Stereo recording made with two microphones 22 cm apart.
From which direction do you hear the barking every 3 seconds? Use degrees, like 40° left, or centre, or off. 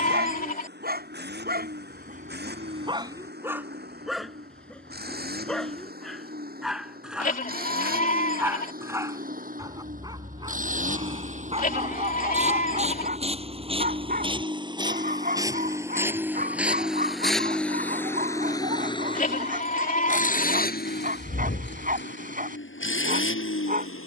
40° right, centre, 10° right, 20° right, 40° right, 40° right, 40° right, 40° right.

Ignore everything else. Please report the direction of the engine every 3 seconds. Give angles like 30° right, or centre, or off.
50° right, 50° right, 40° right, 40° right, 30° right, 10° right, 30° left, 60° left.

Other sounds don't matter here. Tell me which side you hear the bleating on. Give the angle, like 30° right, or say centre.
40° left.